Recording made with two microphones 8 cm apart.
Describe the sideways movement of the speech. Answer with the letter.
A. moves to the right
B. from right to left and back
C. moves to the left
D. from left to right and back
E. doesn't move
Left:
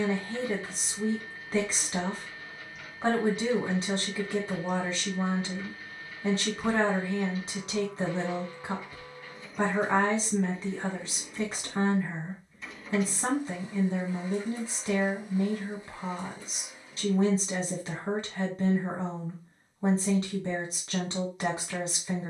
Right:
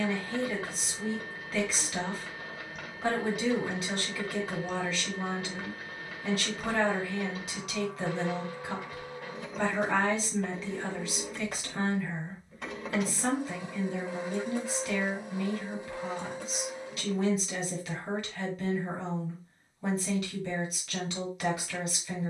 E.